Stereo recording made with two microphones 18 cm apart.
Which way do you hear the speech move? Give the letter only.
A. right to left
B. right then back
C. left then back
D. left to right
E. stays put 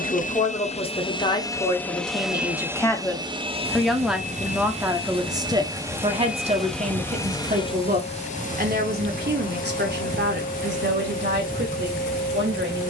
D.